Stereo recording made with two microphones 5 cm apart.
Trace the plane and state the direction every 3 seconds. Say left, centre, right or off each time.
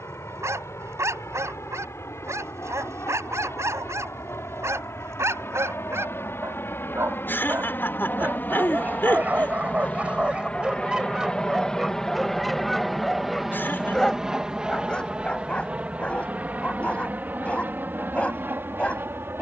left, left, left, left, centre, right, right.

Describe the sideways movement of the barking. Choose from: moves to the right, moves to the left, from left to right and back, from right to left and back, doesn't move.
moves to the left.